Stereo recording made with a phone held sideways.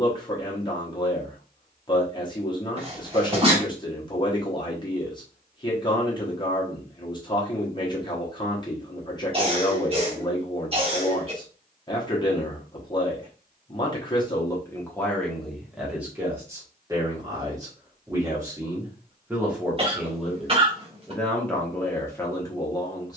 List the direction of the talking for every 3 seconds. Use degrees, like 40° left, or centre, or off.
30° left, 30° left, 30° left, 30° left, 20° left, 10° right, 10° right, 20° left.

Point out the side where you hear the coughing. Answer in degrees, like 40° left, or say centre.
40° right.